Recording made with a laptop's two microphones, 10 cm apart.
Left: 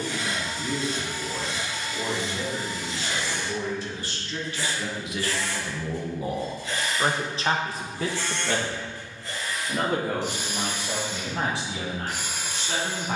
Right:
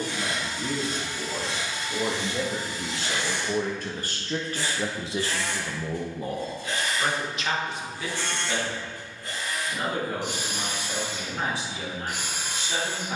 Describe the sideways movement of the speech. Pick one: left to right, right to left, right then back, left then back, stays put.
right to left.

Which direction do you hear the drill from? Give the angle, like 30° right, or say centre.
50° right.